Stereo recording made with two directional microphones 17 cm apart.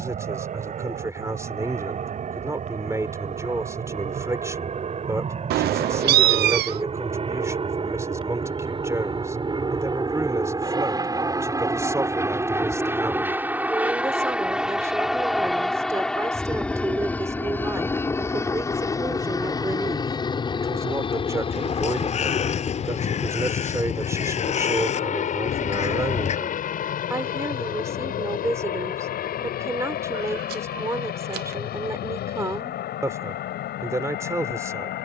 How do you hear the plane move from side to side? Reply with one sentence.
In this clip you hear the plane travel towards the left.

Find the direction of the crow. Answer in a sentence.
In this clip you hear the crow on the left.